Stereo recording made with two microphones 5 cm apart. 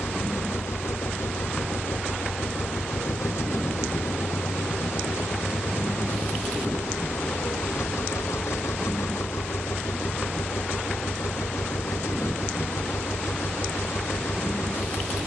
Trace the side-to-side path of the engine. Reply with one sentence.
You can hear the engine stay in one place.